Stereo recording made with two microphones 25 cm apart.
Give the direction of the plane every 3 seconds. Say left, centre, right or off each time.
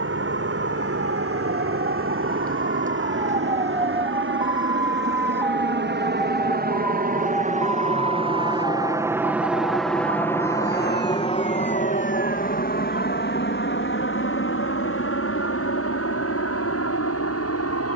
right, right, right, centre, left, left.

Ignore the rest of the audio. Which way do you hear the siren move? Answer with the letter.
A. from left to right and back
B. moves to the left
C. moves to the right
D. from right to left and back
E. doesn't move
B.